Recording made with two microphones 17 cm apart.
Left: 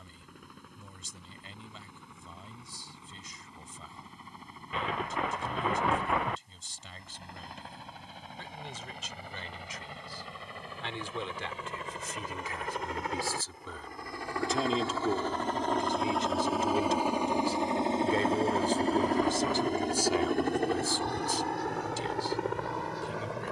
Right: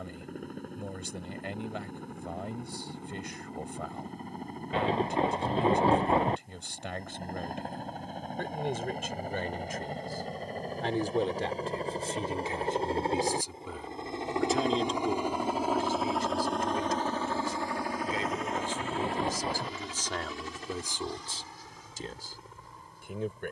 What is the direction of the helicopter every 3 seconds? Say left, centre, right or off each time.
right, right, right, right, right, centre, left, left.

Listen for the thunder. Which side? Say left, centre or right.
right.